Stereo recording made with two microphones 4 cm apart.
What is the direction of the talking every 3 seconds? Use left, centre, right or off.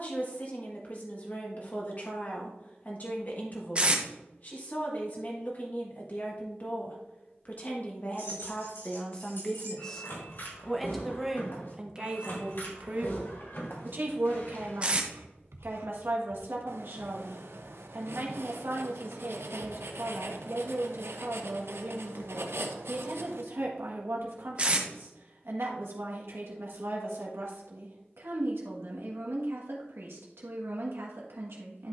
left, left, left, centre, right, right, right, right, right, right, right.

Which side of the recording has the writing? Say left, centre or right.
right.